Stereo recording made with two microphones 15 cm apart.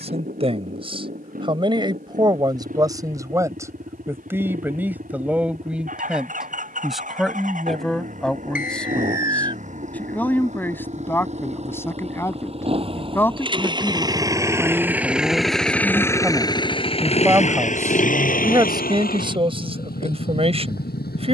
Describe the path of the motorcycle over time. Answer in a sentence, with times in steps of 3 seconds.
In this clip you hear the motorcycle on the right from 0 s and on the left from 15 s.